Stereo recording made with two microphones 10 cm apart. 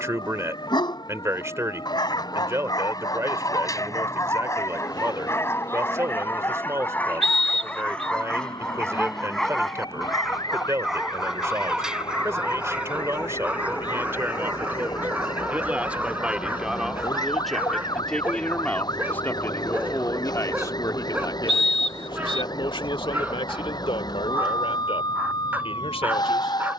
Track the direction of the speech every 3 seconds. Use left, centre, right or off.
right, right, right, right, right, centre, left, left, left.